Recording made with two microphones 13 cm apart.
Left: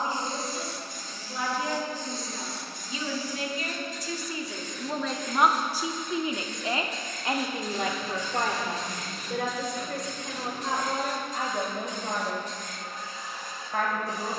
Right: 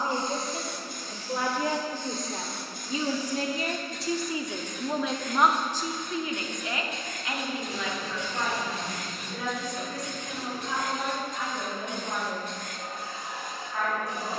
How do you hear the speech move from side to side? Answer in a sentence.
In this clip you hear the speech move to the left.